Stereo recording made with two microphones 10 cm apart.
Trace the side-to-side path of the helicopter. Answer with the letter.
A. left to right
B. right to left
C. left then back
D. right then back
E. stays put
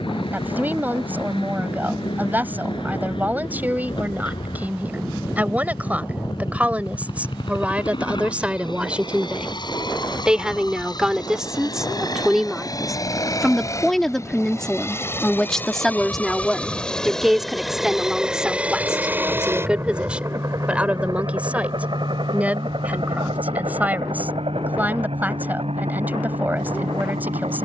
A.